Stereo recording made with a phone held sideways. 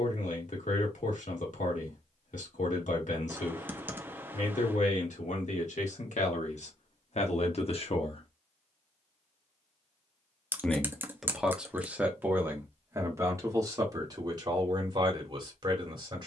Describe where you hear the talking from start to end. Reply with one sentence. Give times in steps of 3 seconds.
You can hear the talking on the left from 0 s, in the centre from 9 s and on the right from 12 s.